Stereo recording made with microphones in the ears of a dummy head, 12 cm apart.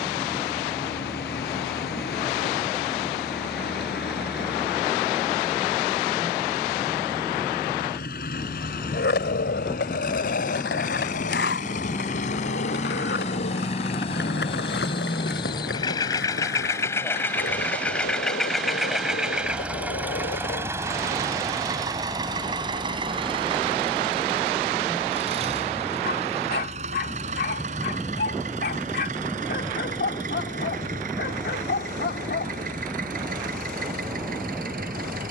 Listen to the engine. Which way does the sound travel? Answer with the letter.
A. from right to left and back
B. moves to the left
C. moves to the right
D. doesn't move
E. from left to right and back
C.